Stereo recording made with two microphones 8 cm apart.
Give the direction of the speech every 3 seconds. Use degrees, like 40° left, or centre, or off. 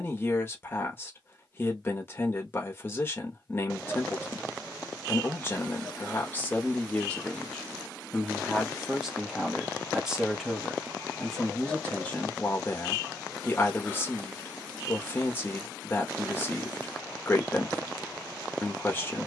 30° left, 30° left, 10° left, centre, 20° left, 20° left, 20° left.